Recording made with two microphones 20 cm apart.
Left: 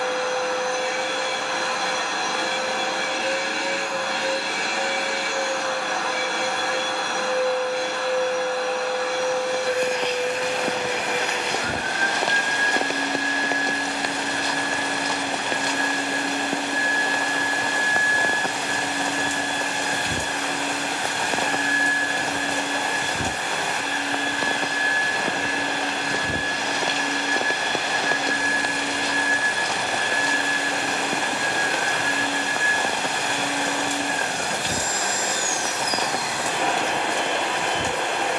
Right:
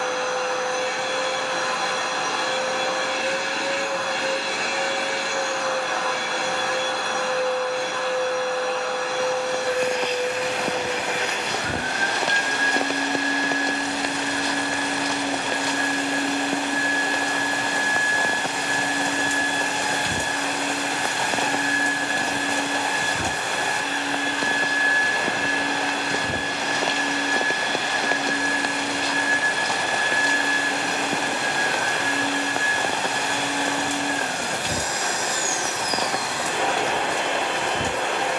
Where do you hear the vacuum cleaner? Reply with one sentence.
You can hear the vacuum cleaner on the left.